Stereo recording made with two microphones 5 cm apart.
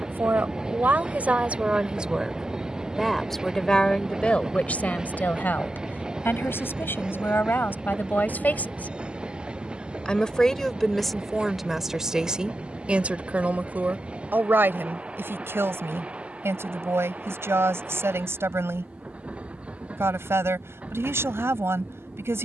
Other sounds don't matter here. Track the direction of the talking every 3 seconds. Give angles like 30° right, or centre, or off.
30° right, 20° left, 40° left, 10° left, 30° right, 50° right, 50° right, 50° right.